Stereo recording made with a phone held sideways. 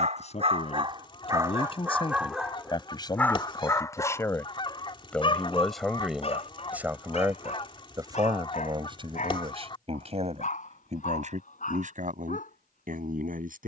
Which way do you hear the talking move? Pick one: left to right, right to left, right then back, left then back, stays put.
left to right.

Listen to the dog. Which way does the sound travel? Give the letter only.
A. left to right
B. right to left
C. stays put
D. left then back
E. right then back
B.